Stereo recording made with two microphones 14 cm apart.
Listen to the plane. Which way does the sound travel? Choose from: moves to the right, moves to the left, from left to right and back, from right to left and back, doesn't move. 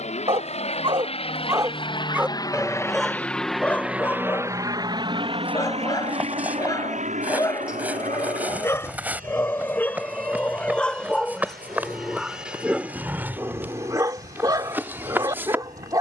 moves to the right.